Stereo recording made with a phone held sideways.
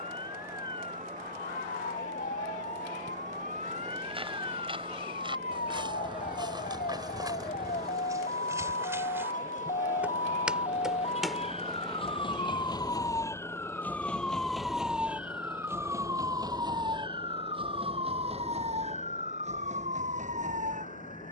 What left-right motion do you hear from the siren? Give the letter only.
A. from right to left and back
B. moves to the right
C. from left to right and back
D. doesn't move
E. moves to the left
B.